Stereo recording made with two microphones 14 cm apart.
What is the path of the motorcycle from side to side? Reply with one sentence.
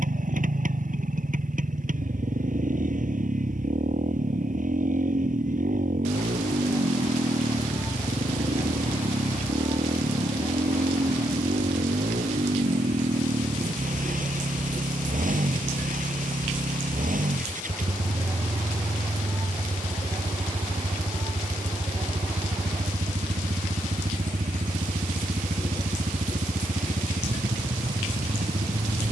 In this clip you hear the motorcycle stay put.